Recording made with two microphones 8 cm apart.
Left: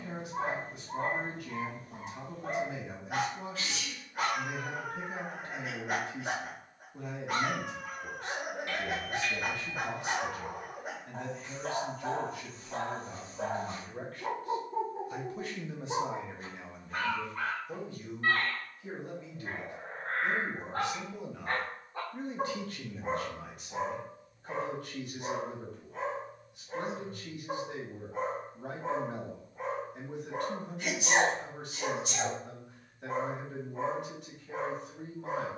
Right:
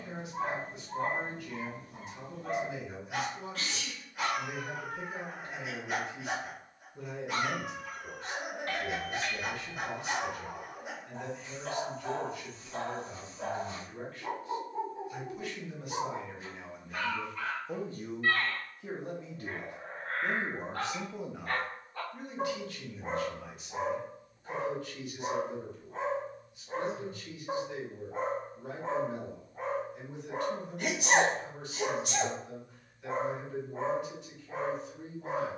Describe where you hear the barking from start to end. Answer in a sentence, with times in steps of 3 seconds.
In this clip you hear the barking on the left from 0 s, in the centre from 21 s and on the right from 24 s.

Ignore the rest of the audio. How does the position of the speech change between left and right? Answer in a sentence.
In this clip you hear the speech go right and come back.